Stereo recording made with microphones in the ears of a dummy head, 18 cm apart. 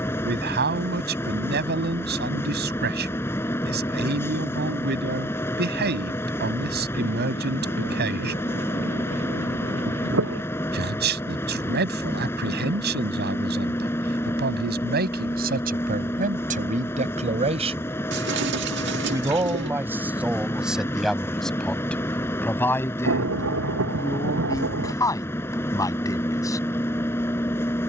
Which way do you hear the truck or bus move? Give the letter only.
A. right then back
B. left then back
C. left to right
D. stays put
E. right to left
D.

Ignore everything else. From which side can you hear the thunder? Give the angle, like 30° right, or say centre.
80° right.